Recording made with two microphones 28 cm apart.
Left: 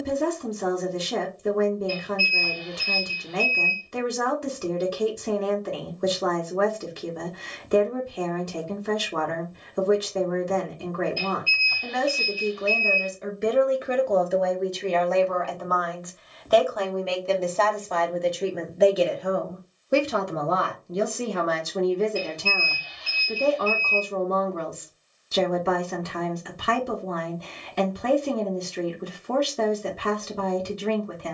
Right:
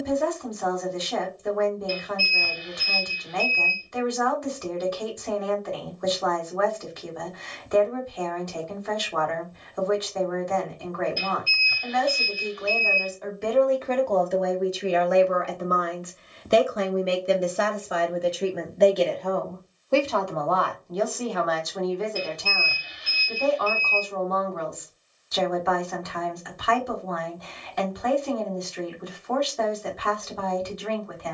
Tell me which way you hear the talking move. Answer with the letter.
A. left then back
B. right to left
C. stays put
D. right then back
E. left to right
D.